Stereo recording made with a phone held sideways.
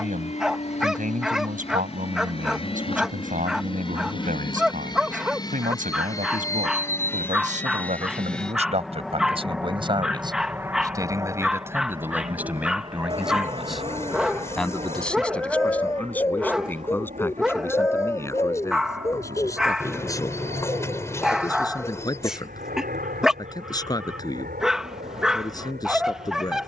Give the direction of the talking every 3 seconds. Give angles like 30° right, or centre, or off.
70° right, 70° right, 60° right, 30° right, centre, 10° left, 20° left, 30° left, 30° left.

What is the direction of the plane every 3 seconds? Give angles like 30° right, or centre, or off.
50° left, 30° left, 10° left, 10° right, 40° right, 50° right, 60° right, 70° right, 70° right.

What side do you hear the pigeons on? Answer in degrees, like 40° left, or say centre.
20° left.